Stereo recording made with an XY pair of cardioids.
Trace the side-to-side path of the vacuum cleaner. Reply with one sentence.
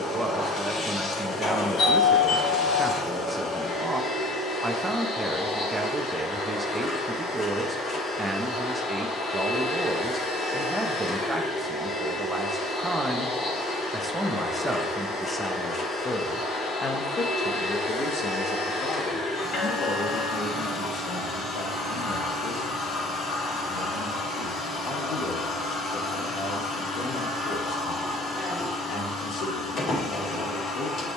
In this clip you hear the vacuum cleaner stay put.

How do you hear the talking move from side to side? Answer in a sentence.
In this clip you hear the talking move to the left.